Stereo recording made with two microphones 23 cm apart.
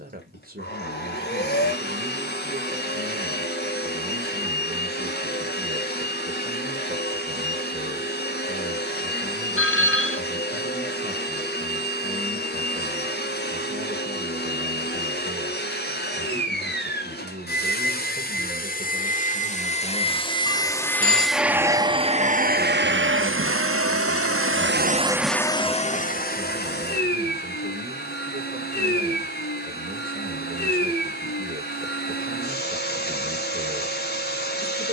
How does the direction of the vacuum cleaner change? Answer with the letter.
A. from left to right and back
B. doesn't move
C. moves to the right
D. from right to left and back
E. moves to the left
A.